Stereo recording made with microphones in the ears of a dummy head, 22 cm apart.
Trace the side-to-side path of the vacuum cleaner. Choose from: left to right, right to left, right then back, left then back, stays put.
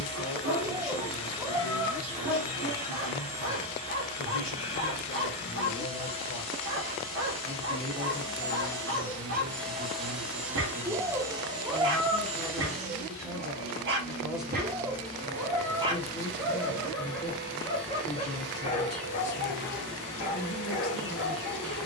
left to right.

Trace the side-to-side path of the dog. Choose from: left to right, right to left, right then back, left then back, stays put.
right to left.